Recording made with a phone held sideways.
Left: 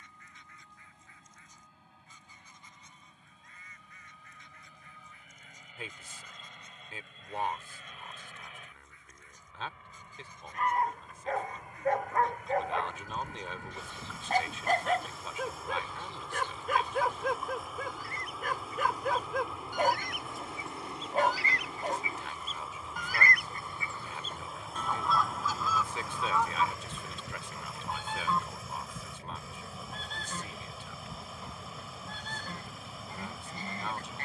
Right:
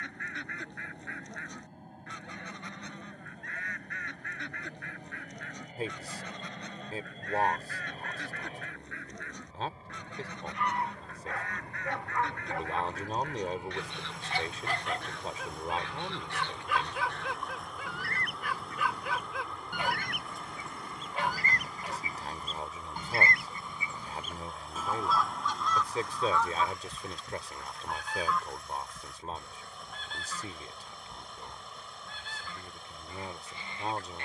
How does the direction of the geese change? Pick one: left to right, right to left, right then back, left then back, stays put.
right to left.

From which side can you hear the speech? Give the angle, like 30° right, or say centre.
40° right.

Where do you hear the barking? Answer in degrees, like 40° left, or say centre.
40° left.